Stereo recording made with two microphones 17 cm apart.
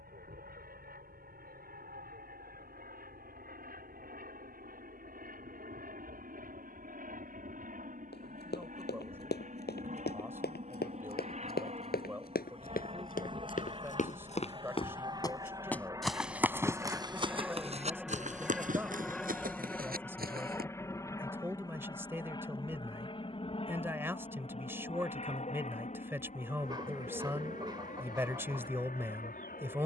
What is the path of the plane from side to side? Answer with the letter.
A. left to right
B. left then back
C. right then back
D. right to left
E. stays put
D.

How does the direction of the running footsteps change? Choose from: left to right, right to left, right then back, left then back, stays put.
left to right.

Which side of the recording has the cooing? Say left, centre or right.
right.